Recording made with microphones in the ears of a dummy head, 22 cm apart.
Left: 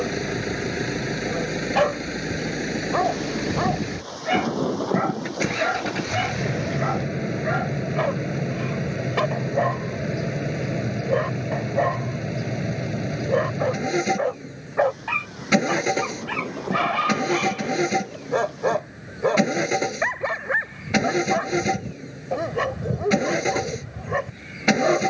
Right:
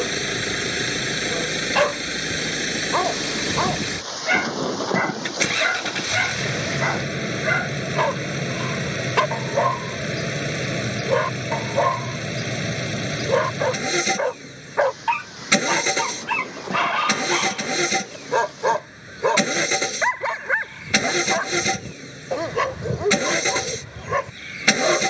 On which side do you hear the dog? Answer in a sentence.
You can hear the dog on the right.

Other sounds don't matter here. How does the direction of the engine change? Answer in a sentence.
You can hear the engine stay put.